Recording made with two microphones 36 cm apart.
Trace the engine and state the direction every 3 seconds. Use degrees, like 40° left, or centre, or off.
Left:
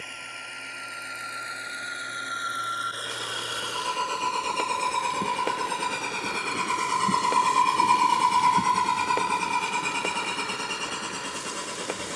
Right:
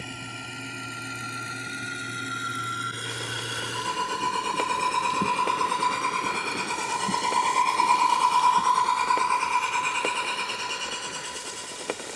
40° right, 20° right, 20° left, 60° left.